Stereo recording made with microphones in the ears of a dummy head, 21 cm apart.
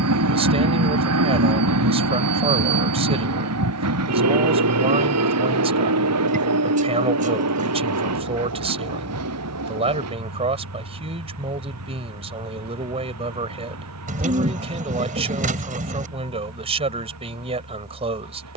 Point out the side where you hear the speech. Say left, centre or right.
right.